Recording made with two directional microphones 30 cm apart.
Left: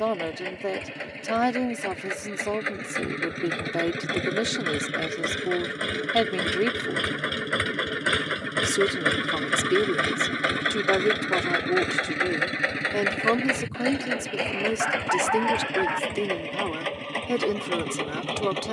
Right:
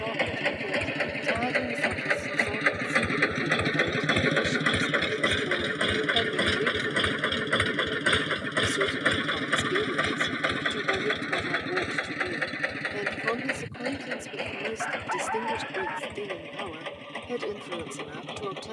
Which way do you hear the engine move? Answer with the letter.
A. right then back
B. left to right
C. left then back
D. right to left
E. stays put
D.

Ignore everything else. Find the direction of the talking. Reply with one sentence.
You can hear the talking on the left.